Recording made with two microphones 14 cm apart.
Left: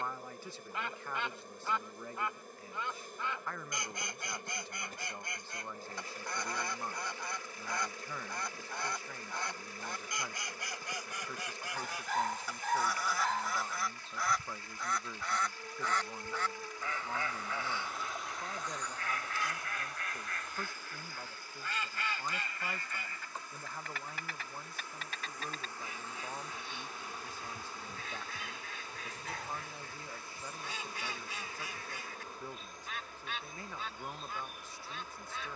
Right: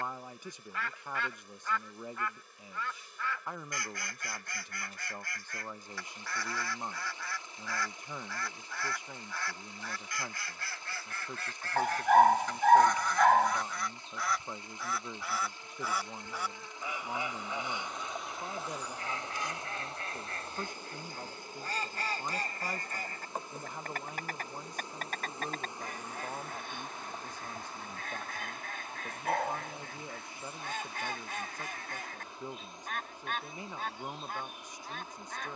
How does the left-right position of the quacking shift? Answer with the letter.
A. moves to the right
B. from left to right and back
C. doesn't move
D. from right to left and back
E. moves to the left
A.